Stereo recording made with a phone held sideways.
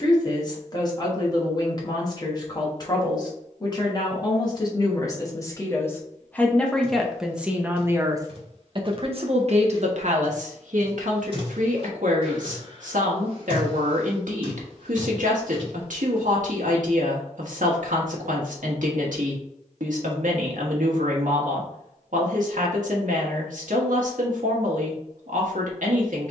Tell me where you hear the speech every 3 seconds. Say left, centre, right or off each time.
left, left, centre, right, right, right, right, right, right.